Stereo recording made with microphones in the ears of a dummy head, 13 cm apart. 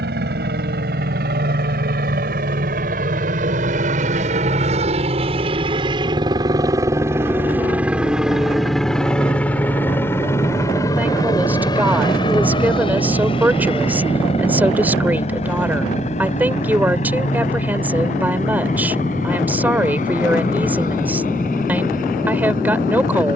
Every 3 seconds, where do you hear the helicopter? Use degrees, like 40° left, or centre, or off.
70° right, 50° right, 10° right, 20° left, 40° left, 50° left, 50° left, 50° left.